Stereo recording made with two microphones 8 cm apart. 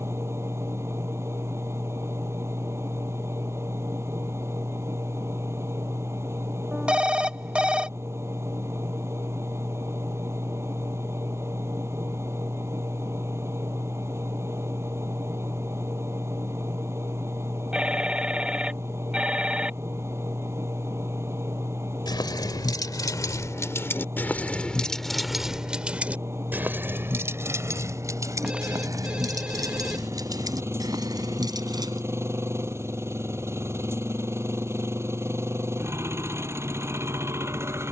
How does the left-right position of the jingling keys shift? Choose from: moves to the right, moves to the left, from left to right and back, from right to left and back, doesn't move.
moves to the right.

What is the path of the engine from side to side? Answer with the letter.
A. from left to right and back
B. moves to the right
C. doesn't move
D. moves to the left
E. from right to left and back
C.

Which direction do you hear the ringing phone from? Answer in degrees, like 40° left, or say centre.
10° right.